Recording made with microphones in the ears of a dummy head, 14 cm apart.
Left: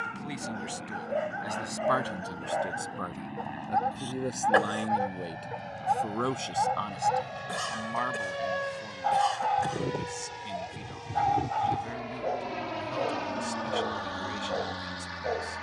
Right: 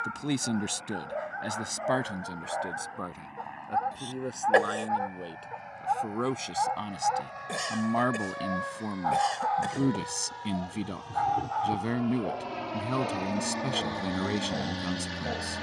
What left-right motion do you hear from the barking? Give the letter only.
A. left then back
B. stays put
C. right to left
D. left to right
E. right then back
B.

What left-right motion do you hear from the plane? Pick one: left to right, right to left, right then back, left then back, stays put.
left to right.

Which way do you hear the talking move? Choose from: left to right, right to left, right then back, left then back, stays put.
left then back.